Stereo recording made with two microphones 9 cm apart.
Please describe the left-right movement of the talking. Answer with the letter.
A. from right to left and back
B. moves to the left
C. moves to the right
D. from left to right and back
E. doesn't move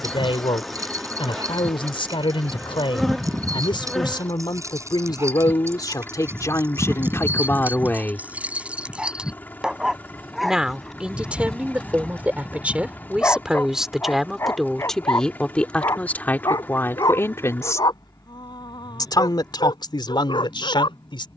D.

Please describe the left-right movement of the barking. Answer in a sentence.
You can hear the barking travel towards the left.